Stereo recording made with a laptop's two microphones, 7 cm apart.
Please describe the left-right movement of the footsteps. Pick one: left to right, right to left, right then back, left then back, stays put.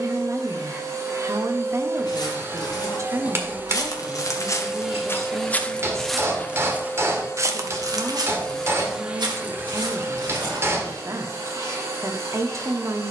left to right.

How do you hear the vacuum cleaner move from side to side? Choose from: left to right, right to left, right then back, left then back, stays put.
left then back.